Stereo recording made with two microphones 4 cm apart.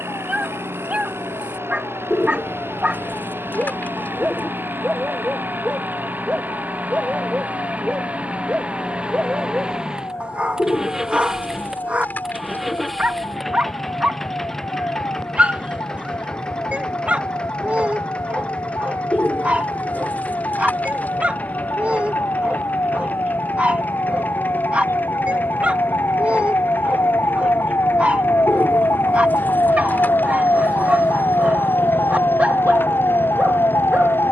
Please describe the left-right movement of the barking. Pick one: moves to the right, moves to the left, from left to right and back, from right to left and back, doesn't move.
doesn't move.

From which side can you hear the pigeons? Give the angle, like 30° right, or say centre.
40° left.